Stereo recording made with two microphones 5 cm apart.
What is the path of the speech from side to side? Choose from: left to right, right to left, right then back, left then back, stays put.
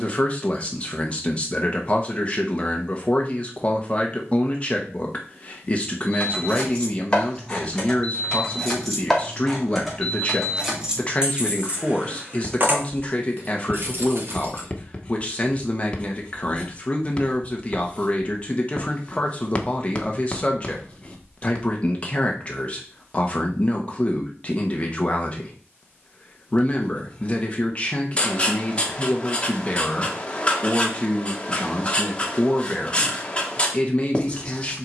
stays put.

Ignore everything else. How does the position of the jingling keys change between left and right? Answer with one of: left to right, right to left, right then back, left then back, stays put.
left to right.